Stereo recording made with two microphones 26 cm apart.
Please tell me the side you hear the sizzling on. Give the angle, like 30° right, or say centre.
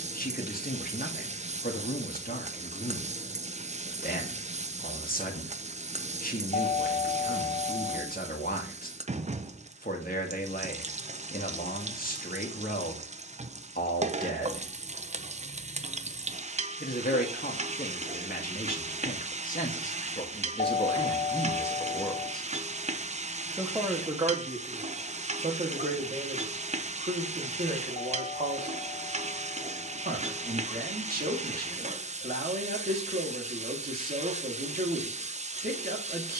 30° right.